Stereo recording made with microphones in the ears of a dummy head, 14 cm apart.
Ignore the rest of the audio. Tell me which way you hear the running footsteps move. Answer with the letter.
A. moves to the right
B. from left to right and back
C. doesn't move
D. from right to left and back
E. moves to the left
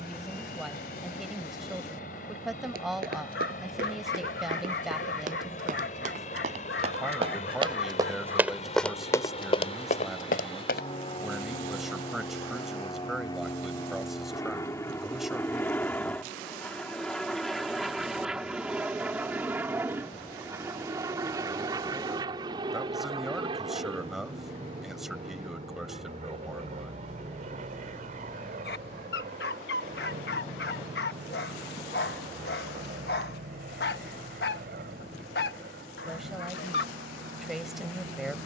E.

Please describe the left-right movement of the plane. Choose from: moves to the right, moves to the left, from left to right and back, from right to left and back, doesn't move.
moves to the right.